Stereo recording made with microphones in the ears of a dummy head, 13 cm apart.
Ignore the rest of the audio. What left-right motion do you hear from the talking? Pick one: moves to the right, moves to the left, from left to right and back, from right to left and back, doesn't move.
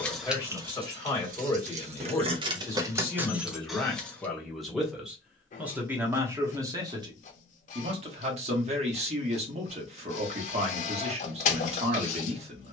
moves to the right.